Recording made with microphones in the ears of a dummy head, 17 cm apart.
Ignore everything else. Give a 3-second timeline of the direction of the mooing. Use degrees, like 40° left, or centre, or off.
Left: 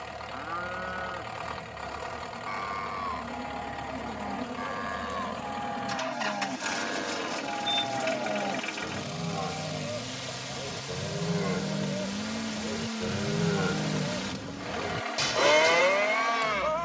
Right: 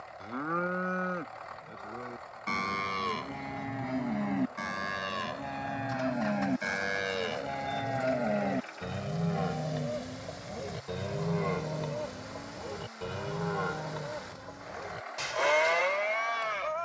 40° right, 30° right, 20° right, centre, 30° left, 60° left.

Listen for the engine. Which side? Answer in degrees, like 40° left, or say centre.
90° left.